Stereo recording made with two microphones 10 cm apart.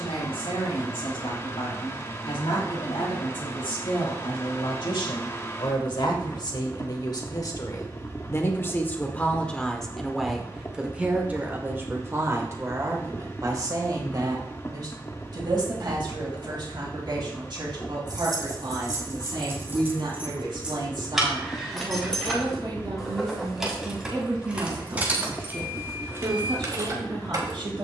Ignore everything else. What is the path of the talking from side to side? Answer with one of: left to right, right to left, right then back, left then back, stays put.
left to right.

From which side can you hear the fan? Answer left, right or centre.
left.